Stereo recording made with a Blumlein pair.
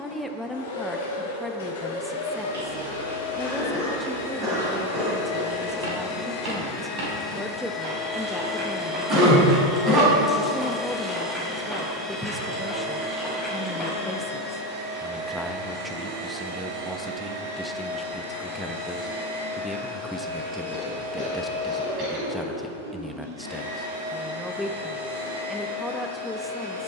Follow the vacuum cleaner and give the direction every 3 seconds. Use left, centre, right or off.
left, left, left, centre, right, right, right, right, right.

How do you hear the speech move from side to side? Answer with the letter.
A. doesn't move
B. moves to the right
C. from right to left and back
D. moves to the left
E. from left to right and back
A.